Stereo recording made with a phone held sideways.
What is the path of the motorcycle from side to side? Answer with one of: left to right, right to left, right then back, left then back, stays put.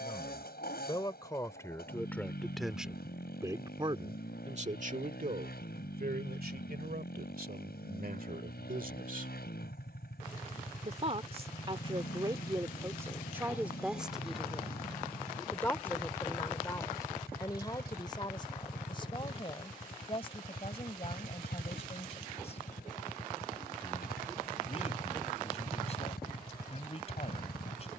stays put.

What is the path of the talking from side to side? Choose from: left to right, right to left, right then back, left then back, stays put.
right then back.